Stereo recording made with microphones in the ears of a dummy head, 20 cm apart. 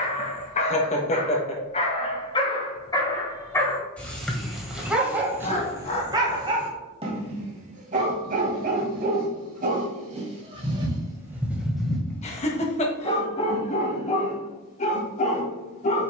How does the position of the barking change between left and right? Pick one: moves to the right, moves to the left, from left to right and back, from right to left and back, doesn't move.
from left to right and back.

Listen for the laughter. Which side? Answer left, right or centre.
left.